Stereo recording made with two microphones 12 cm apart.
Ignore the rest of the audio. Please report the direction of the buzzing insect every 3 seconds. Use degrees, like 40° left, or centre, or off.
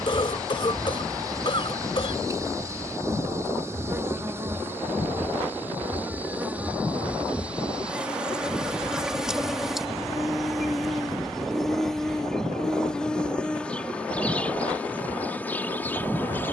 30° right, 20° right, 10° right, centre, 10° left, 20° left.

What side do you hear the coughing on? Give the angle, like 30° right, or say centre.
50° left.